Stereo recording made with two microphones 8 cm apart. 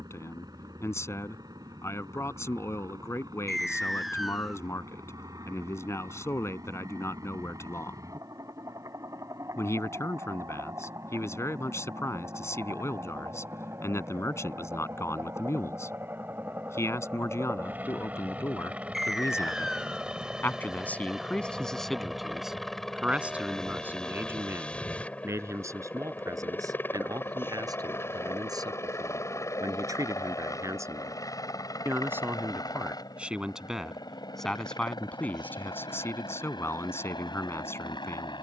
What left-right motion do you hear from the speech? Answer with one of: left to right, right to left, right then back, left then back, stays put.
right then back.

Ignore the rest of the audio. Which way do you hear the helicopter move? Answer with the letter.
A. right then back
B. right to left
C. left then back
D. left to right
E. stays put
B.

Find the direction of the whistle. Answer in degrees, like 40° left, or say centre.
centre.